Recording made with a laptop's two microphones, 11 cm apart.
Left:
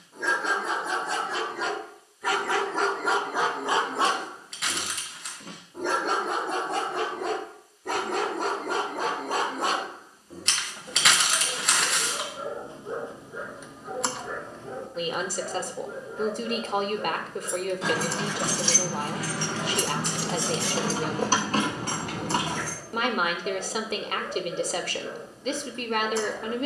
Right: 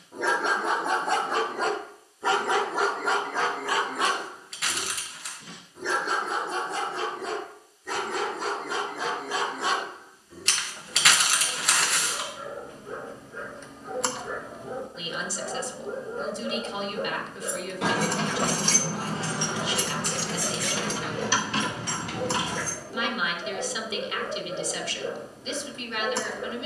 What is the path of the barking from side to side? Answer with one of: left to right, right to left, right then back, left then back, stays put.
left then back.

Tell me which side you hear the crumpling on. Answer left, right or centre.
centre.